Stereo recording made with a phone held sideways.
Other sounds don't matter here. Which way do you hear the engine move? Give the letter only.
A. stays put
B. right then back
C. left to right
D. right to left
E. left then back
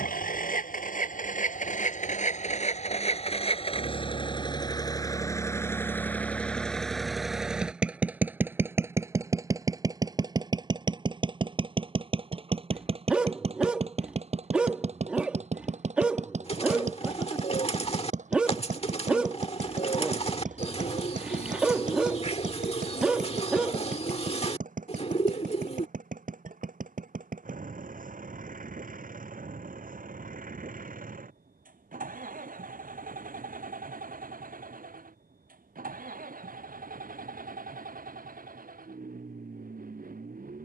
C.